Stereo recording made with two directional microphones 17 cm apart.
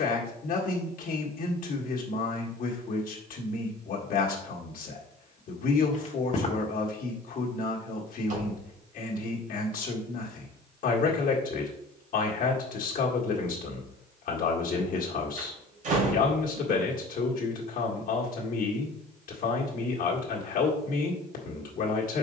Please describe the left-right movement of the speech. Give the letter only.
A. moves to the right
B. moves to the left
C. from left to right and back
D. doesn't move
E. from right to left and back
D.